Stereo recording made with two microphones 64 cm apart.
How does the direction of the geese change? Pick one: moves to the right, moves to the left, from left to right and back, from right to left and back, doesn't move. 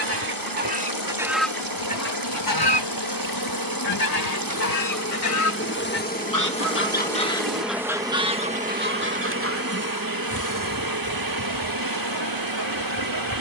from right to left and back.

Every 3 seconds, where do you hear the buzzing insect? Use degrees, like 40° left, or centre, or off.
50° left, 30° left, centre, 30° right, 40° right.